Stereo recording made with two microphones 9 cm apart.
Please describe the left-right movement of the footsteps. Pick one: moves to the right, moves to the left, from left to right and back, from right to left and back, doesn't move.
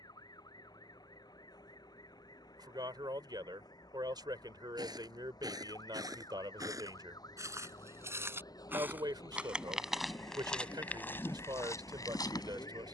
moves to the left.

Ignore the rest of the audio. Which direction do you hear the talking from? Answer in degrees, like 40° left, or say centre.
50° right.